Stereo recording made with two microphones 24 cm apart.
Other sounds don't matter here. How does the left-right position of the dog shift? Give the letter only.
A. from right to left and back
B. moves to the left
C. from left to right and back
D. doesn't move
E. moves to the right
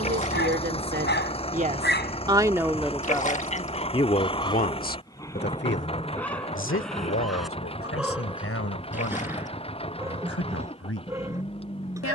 E.